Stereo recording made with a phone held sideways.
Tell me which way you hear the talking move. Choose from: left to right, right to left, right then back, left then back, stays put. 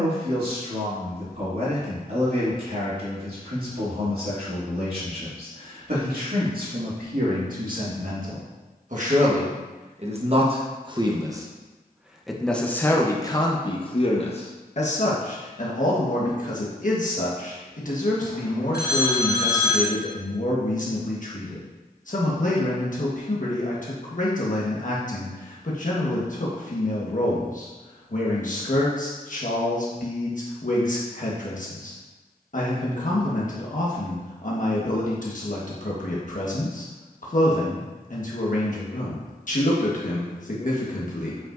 right to left.